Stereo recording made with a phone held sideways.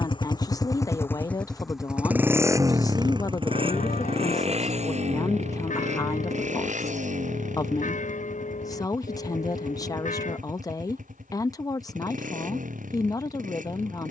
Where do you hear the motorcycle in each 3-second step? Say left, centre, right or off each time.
centre, right, right, right, right.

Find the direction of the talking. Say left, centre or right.
left.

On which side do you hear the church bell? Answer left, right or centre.
left.